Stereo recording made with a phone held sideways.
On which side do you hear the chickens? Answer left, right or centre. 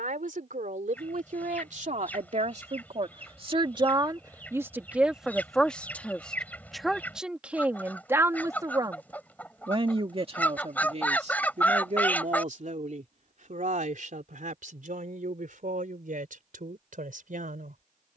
centre.